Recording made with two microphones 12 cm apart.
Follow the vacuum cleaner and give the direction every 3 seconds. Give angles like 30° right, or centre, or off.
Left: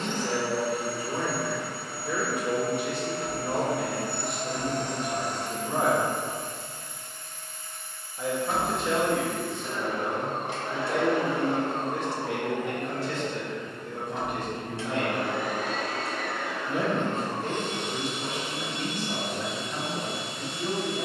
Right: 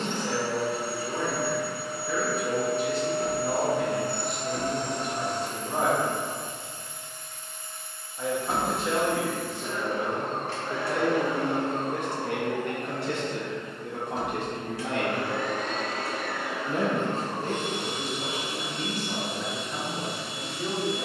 20° right, 20° right, 20° right, 20° left, 40° left, centre, 10° right.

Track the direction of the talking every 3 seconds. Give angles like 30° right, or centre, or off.
20° left, 20° left, centre, 30° right, 70° right, 40° right, centre.